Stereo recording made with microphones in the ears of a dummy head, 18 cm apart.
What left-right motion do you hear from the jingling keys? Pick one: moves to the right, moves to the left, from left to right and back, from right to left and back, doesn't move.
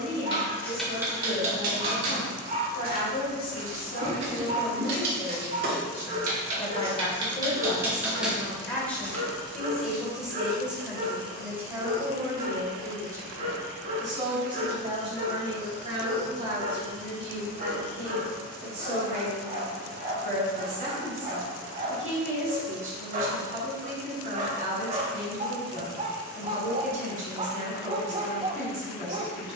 from left to right and back.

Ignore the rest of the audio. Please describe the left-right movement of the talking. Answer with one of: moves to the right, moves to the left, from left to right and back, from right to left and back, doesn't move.
moves to the right.